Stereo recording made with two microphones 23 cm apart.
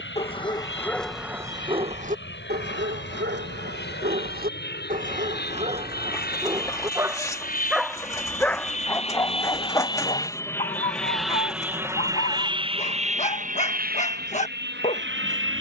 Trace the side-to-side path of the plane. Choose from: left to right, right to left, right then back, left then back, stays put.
left to right.